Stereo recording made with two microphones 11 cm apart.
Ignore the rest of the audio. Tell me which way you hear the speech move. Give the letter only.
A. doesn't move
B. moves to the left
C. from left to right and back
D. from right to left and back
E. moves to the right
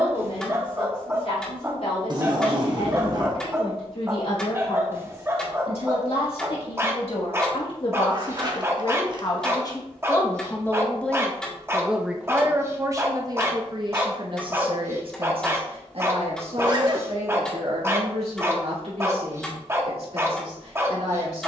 E.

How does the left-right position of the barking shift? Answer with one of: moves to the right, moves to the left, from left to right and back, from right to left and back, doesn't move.
doesn't move.